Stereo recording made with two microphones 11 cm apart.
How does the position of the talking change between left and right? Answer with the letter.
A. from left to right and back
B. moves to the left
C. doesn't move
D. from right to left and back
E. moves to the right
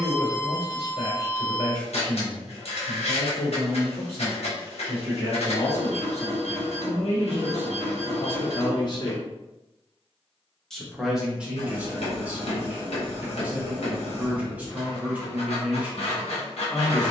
E.